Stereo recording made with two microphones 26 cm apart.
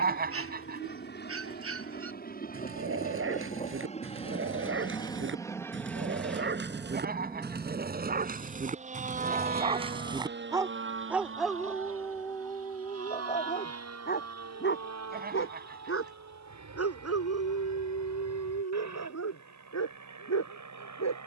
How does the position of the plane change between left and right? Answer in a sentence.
In this clip you hear the plane move from left to right.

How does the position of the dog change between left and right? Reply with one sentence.
You can hear the dog move to the left.